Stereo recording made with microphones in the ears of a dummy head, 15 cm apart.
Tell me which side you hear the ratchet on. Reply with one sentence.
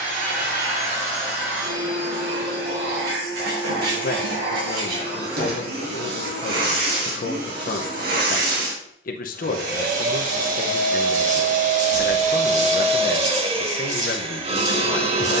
You can hear the ratchet on the right.